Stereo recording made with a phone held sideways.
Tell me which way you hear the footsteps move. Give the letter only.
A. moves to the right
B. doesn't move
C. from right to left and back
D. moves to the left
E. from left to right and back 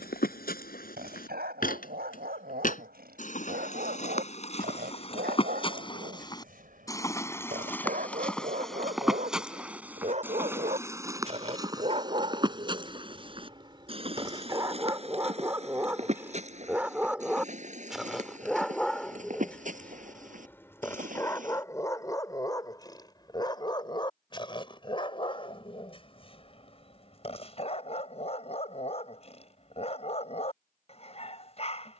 A.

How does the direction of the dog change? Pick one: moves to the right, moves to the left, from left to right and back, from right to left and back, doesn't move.
moves to the left.